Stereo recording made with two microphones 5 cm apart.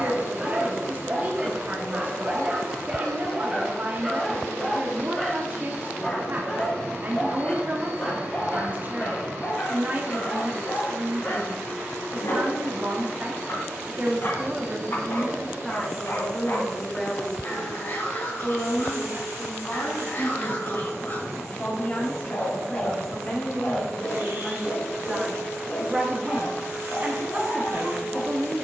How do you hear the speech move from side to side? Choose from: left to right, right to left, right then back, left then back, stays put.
left then back.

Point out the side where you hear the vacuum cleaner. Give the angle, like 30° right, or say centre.
70° right.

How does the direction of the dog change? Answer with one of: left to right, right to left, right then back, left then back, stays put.
right to left.